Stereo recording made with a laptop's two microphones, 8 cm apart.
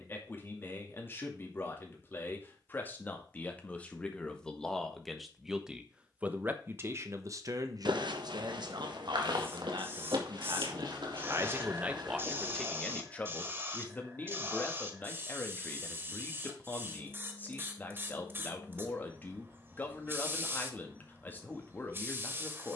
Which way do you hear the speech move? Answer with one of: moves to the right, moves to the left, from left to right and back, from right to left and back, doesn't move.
from left to right and back.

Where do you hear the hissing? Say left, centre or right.
right.